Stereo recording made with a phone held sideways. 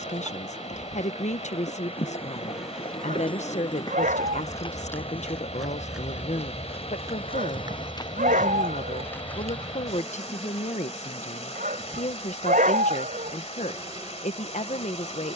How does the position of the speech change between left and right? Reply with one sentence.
You can hear the speech stay put.